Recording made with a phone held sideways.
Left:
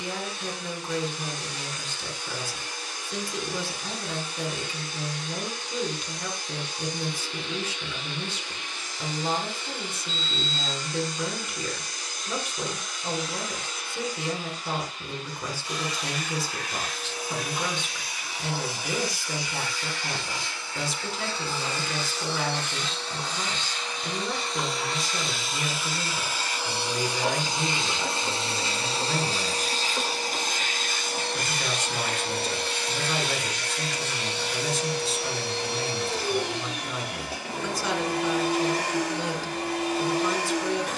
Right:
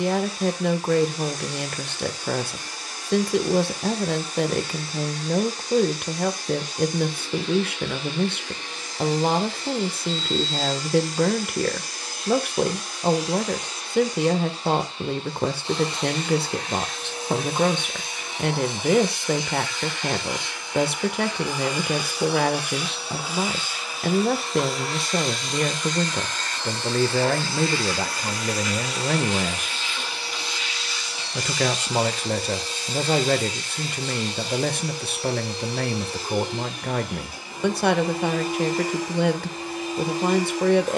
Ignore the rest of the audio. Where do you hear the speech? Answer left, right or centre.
right.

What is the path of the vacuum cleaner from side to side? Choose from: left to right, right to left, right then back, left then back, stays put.
right to left.